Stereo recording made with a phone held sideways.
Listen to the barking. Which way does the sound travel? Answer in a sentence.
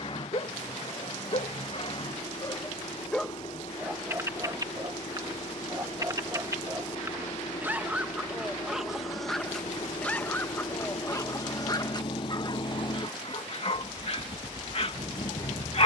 You can hear the barking move from left to right and back again.